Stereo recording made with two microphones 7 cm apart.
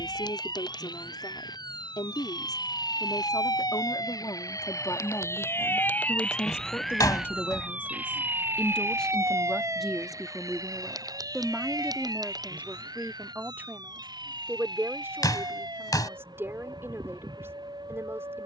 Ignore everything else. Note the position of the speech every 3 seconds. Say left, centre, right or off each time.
left, left, left, centre, right, right.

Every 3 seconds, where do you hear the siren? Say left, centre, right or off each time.
left, left, centre, right, right, right.